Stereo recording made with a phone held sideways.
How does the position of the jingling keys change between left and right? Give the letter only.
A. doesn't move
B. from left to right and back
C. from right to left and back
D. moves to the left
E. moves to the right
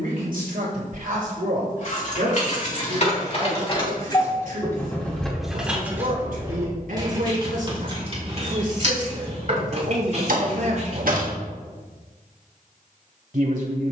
E.